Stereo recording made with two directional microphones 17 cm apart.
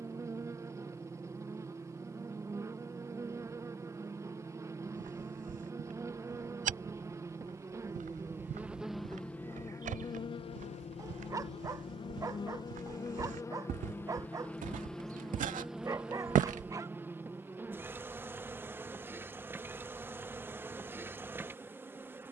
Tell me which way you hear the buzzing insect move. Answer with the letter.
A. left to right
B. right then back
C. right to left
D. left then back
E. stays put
D.